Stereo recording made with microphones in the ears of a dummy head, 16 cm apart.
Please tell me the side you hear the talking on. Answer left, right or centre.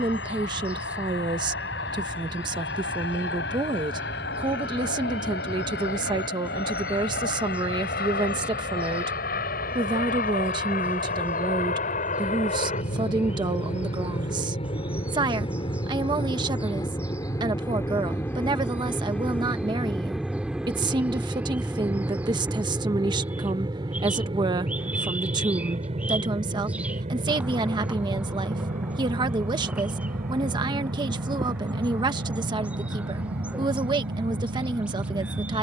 right.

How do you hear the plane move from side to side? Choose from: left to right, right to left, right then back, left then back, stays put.
left to right.